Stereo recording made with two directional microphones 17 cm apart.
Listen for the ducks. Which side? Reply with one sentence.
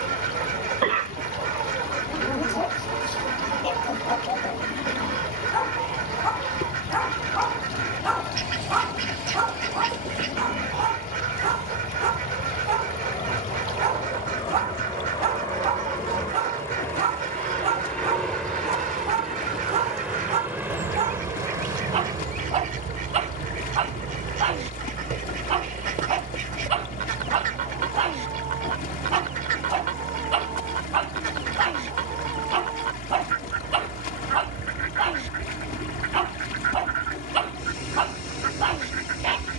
You can hear the ducks on the right.